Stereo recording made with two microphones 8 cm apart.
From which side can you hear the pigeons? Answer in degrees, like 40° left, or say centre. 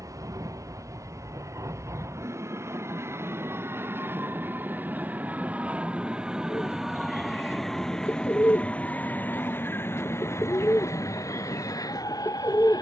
40° left.